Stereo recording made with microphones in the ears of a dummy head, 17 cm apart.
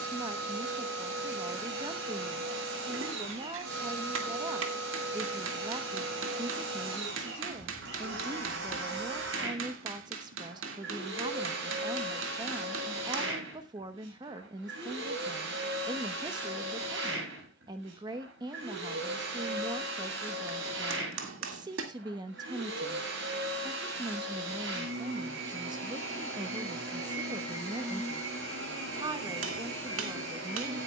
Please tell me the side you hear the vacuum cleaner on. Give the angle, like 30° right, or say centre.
60° right.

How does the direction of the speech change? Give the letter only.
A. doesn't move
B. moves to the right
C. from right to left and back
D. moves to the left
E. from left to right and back
A.